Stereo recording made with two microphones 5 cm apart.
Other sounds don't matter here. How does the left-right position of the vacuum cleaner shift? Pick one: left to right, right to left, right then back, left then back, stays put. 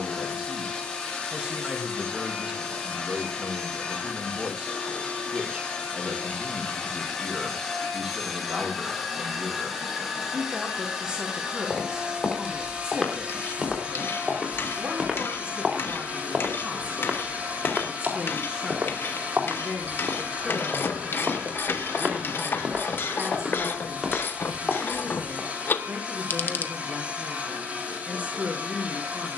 left to right.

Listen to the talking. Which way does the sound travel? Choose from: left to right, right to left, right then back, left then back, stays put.
stays put.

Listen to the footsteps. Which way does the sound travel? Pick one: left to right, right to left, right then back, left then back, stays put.
right then back.